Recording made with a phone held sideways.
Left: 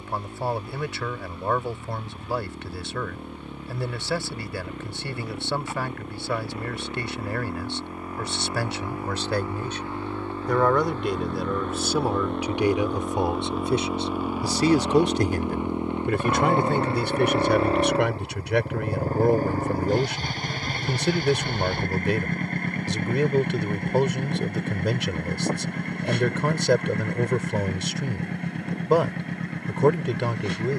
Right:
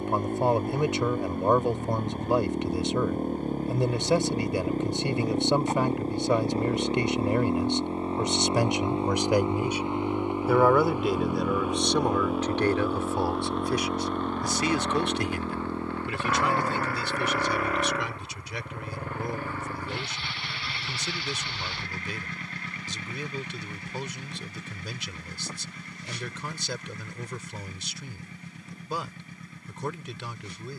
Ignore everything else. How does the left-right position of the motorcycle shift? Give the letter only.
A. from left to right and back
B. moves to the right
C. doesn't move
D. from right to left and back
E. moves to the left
E.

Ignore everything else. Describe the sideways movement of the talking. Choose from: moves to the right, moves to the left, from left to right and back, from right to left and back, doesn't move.
moves to the left.